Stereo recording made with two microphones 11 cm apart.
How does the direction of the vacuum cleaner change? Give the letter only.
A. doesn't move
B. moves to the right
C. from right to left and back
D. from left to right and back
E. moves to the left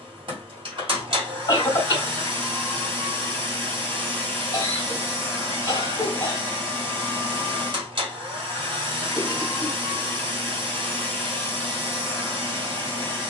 A.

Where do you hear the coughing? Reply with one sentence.
You can hear the coughing on the left.